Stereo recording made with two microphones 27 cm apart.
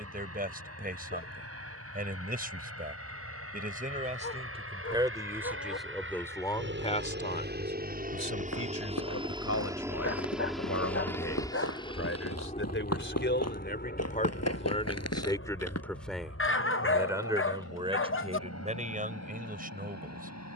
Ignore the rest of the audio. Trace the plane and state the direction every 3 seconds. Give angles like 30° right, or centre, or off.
70° right, 60° right, 40° right, centre, 30° left, 50° left, 60° left.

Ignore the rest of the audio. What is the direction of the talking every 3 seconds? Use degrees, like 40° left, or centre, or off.
30° right, 20° right, 30° left, 60° left, 40° left, centre, 30° right.